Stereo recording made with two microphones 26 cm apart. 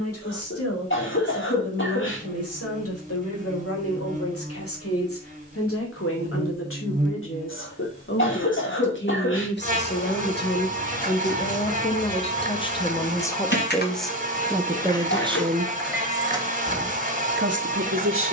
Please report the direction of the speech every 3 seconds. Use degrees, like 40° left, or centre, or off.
60° left, 60° left, 50° left, 40° left, 10° left, 30° right.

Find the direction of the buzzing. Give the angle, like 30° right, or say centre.
30° right.